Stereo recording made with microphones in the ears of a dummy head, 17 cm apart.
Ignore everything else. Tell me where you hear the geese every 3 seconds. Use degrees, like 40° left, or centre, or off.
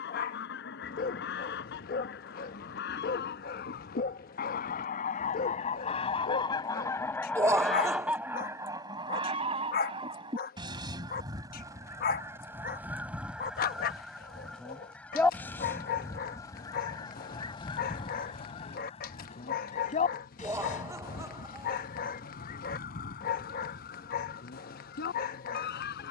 70° left, 50° left, centre, 20° right, centre, 20° left, 40° left, 50° left, 60° left.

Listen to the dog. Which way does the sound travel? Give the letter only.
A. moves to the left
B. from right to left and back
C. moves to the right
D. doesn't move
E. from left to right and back
D.